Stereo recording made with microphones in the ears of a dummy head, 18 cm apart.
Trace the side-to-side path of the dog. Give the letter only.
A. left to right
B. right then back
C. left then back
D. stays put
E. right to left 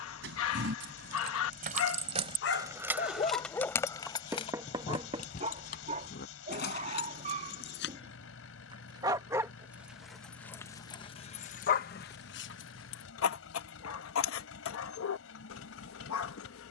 B.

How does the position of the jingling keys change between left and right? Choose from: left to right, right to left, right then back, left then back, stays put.
right to left.